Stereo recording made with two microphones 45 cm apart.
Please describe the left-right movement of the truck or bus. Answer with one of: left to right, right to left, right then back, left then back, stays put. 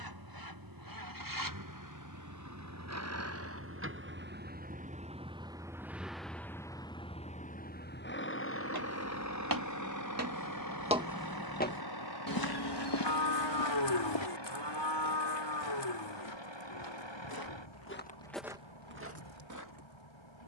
right to left.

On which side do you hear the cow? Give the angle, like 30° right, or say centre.
60° left.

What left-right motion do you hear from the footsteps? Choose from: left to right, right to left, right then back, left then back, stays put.
left then back.